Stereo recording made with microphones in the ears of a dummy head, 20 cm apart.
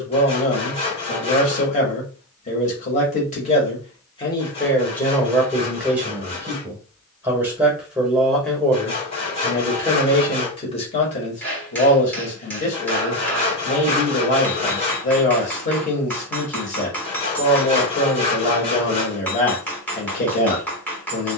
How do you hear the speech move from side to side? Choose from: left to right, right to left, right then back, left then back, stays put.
right then back.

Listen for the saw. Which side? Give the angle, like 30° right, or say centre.
30° left.